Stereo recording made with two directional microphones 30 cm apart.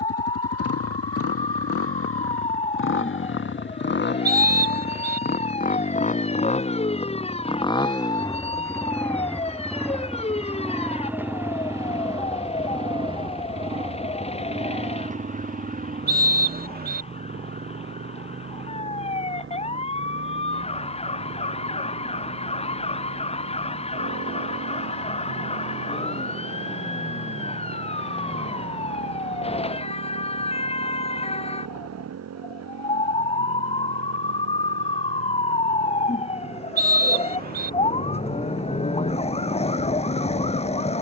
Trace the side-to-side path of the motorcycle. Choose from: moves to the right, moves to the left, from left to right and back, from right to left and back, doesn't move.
moves to the right.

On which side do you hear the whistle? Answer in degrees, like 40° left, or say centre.
30° right.